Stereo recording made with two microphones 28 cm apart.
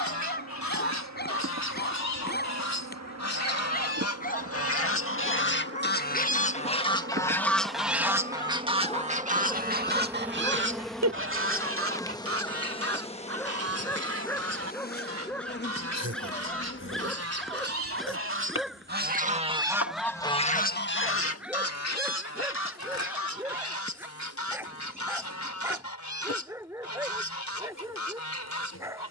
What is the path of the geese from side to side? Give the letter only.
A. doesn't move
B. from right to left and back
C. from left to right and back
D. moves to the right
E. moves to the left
C.